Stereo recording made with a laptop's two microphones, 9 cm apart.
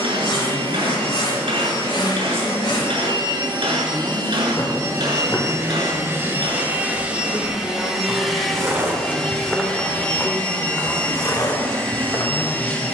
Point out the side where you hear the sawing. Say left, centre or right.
left.